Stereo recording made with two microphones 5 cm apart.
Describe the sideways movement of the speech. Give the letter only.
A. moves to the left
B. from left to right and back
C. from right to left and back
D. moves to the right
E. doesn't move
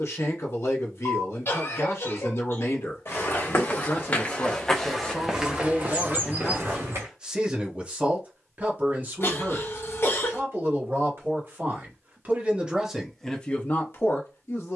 B.